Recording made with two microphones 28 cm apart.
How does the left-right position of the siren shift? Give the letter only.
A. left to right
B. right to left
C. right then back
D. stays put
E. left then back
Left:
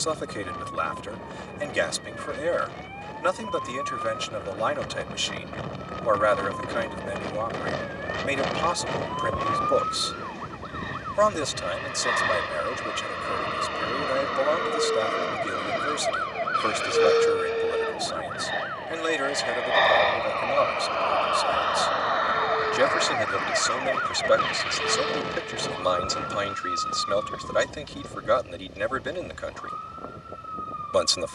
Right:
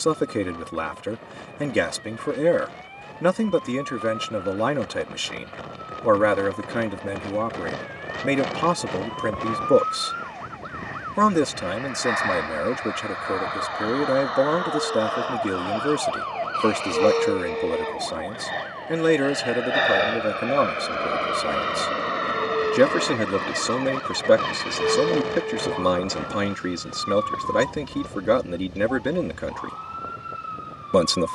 A.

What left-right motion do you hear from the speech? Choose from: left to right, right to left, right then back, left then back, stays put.
stays put.